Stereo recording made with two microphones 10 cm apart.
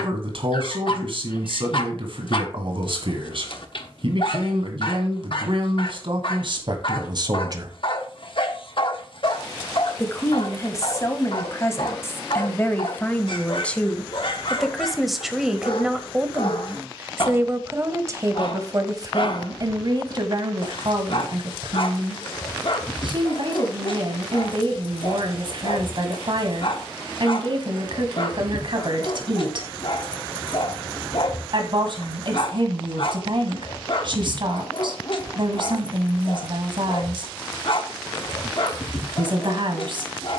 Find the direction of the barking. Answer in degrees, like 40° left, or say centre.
60° left.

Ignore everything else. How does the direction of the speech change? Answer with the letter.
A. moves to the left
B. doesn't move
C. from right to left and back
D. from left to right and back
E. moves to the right
C.